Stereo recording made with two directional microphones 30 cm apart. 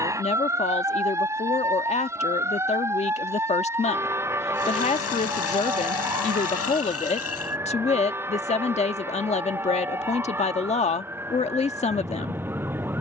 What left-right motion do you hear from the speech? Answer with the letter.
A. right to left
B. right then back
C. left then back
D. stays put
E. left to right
D.